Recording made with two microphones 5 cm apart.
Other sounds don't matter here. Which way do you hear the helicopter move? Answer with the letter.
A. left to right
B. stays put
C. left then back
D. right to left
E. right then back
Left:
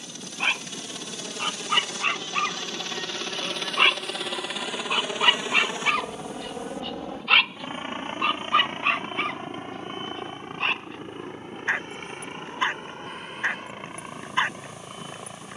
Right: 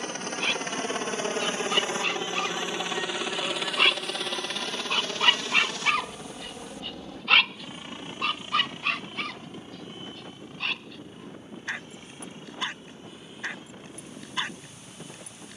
D.